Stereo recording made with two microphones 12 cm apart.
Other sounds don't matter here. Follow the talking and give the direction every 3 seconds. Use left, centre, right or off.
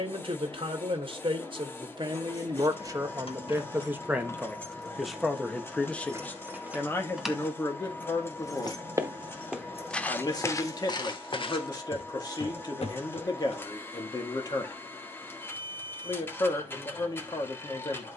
right, centre, left, left, left, left.